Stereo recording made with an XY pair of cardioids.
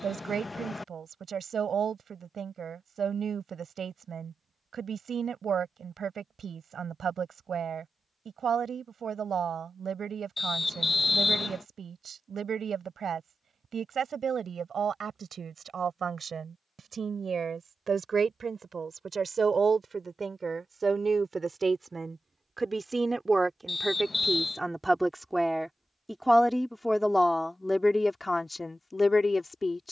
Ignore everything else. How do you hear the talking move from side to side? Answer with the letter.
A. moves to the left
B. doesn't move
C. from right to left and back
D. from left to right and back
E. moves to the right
A.